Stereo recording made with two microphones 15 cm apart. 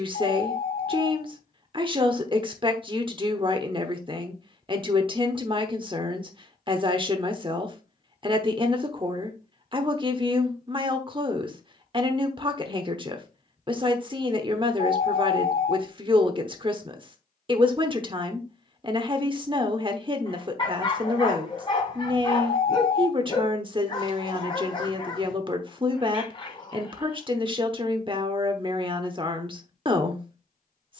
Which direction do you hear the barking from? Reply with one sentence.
You can hear the barking on the left.